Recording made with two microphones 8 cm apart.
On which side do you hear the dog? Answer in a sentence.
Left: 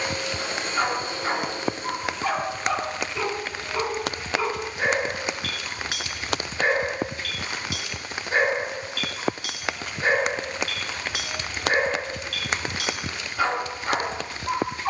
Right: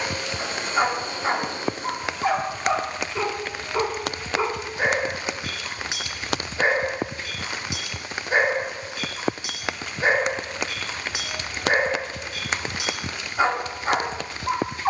In this clip you hear the dog on the right.